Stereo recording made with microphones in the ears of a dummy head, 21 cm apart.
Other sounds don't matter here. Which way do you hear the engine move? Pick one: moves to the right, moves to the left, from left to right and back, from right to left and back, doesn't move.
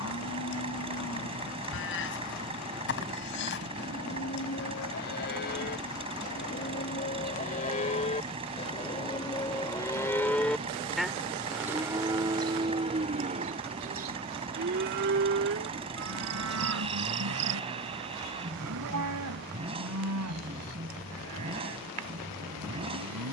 doesn't move.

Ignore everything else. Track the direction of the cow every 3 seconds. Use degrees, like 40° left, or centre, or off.
50° left, 50° left, 30° left, 10° left, 30° right, 60° right, 70° right, 80° right.